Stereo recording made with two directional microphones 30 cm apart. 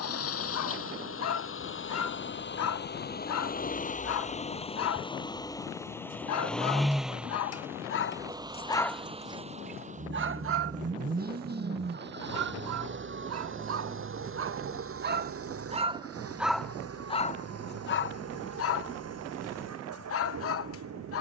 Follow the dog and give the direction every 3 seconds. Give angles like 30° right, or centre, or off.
60° left, 60° left, 40° left, 40° right, 50° right, centre, 50° left.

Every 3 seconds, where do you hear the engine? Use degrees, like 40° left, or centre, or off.
40° left, 20° left, 10° right, 30° right, 40° right, 50° right, 60° right.